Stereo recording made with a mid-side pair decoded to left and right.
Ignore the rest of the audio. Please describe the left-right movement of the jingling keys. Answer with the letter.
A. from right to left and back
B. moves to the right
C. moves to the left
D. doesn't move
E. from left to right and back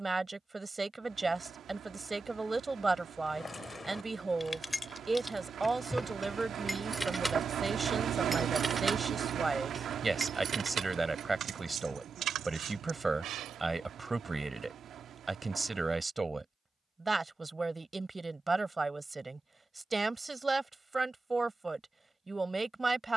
B.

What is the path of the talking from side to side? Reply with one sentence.
In this clip you hear the talking stay in one place.